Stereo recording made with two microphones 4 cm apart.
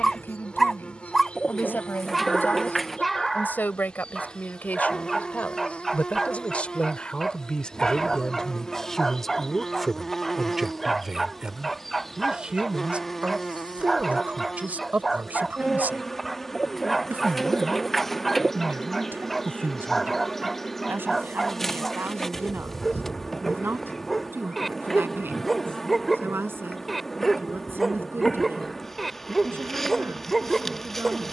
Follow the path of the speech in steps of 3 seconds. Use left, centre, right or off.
left, left, left, centre, right, right, right, right, right, right, right.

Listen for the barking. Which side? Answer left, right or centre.
centre.